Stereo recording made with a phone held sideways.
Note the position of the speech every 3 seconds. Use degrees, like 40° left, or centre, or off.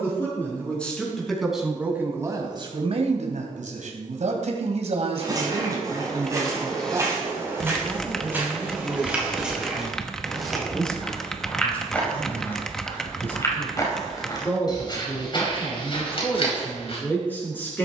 10° right, 50° right, 20° right, centre, 10° left, 10° left.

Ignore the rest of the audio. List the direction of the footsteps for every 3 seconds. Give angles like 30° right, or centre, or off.
off, 30° right, 20° right, centre, 20° left, 40° left.